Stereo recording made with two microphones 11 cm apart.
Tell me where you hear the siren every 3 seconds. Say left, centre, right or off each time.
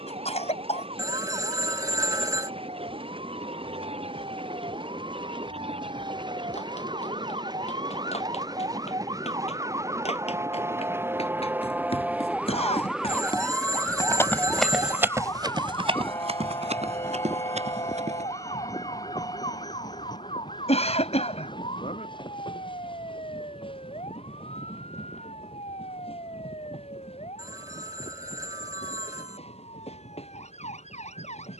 right, right, right, right, centre, left, left, left, left, left, left.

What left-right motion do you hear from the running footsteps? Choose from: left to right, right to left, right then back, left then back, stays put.
left to right.